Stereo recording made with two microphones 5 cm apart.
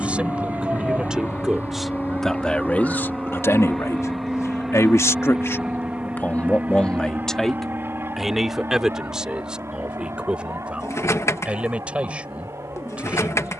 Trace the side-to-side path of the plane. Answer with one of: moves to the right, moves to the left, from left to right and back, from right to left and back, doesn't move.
moves to the right.